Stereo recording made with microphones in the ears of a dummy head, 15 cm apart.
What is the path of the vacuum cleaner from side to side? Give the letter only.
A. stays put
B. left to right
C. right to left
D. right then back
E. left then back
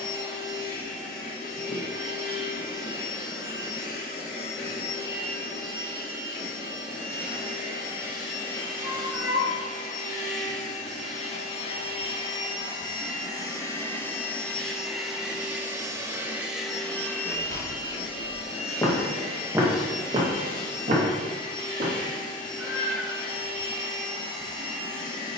D.